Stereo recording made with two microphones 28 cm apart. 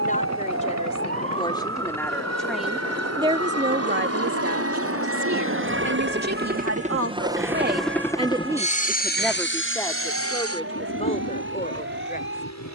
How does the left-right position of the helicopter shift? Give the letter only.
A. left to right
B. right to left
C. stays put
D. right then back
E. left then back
B.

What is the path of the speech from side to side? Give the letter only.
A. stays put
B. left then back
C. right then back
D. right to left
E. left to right
C.